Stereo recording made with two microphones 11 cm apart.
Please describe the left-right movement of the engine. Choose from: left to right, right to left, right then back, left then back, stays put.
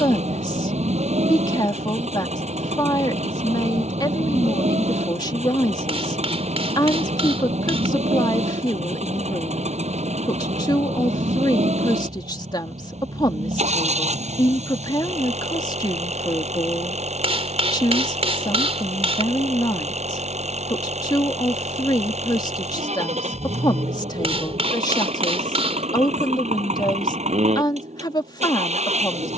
stays put.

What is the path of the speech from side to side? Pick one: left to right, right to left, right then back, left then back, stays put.
stays put.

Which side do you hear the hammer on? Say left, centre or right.
right.